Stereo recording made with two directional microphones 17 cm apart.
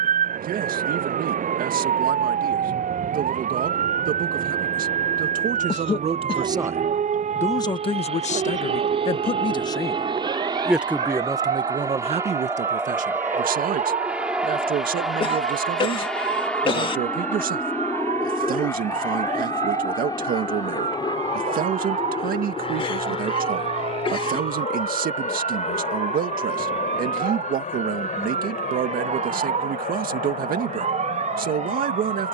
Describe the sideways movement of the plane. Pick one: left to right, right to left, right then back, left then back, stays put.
right to left.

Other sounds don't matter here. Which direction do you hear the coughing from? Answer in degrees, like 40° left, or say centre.
30° left.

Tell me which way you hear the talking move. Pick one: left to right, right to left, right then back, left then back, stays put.
left then back.